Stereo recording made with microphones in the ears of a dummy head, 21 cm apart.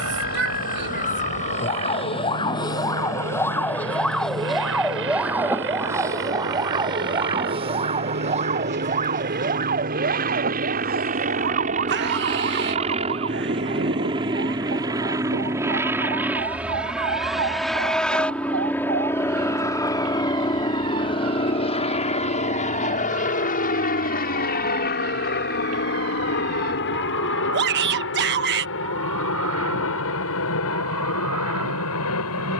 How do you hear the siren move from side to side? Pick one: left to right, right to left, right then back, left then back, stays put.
left to right.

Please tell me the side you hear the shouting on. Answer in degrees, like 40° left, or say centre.
40° right.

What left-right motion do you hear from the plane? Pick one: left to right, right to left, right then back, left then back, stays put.
right to left.